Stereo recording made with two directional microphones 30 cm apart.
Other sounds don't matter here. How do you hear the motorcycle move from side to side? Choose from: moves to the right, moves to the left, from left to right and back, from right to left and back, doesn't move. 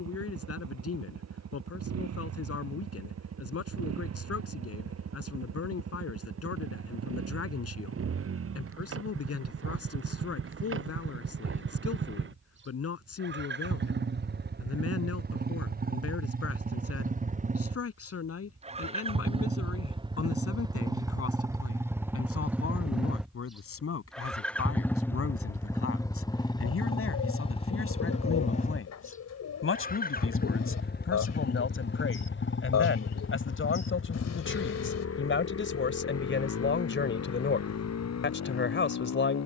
moves to the left.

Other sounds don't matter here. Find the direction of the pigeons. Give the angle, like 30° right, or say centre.
50° left.